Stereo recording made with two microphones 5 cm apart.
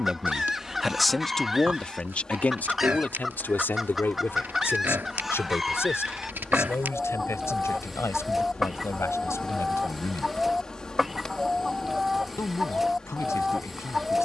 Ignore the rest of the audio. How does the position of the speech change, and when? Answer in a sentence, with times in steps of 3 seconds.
In this clip you hear the speech in the centre from 0 s and on the left from 3 s.